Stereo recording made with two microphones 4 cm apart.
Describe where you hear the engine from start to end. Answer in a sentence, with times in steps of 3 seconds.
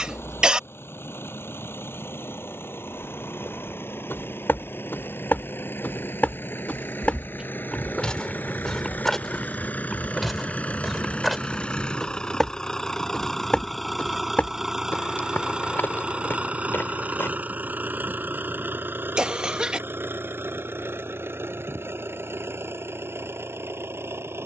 You can hear the engine on the left from 0 s, in the centre from 12 s and on the right from 15 s.